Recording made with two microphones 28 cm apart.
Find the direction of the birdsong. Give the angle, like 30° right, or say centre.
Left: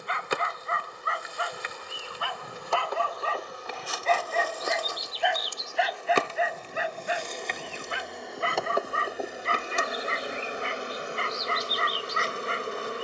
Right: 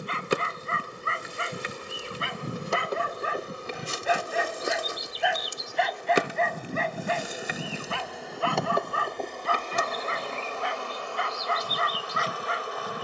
70° right.